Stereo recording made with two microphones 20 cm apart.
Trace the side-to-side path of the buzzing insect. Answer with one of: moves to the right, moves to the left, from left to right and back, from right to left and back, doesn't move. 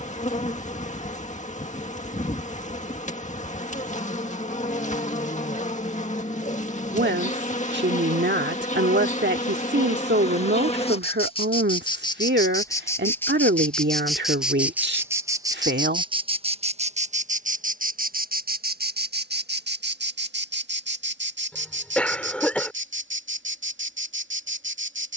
moves to the right.